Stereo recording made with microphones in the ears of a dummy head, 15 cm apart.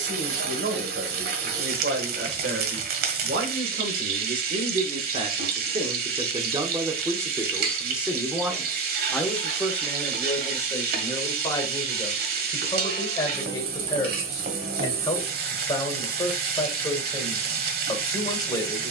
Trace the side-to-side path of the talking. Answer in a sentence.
In this clip you hear the talking travel towards the left.